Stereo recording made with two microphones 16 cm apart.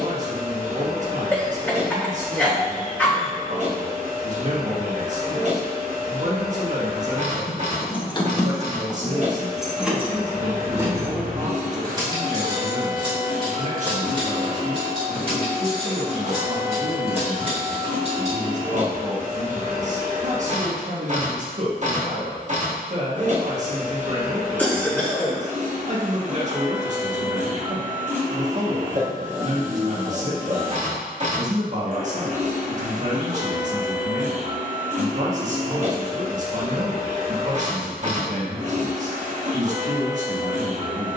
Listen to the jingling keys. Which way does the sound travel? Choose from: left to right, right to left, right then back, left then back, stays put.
left to right.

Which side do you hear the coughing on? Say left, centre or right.
centre.